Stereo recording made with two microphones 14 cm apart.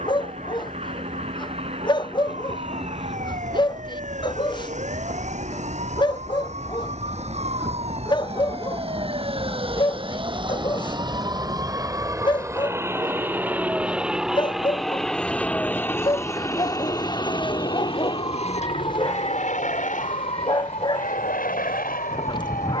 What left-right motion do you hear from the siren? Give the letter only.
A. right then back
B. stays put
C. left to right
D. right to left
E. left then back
D.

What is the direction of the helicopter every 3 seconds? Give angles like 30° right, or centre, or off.
50° right, 50° right, 40° right, 30° right, 10° right, 20° left, 60° left, 70° left.